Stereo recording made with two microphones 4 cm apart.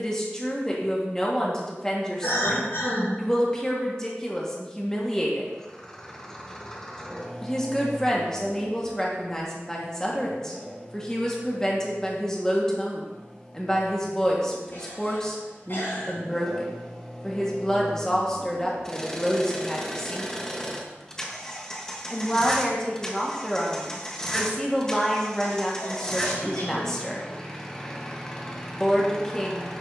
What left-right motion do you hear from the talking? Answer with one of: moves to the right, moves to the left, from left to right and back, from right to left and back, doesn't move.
doesn't move.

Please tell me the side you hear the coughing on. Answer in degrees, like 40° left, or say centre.
60° left.